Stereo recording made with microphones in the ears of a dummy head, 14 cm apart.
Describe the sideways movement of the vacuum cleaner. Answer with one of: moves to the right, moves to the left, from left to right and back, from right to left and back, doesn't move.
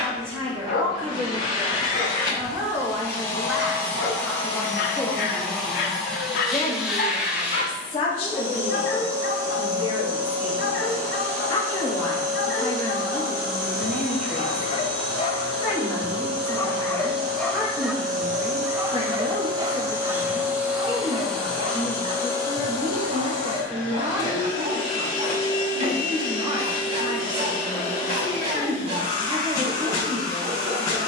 from left to right and back.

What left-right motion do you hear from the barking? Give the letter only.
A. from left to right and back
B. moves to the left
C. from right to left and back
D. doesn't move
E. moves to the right
E.